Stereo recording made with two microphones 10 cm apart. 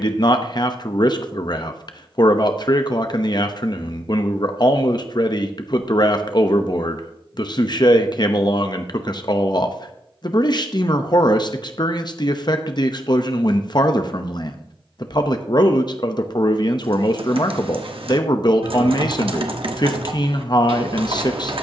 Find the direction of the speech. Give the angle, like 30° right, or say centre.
50° left.